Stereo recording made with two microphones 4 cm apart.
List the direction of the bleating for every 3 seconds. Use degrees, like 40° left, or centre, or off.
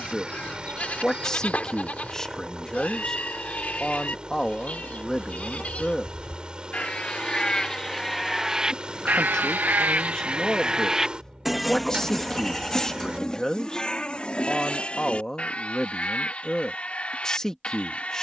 30° left, 30° left, 10° left, 30° right, 20° left, 30° left.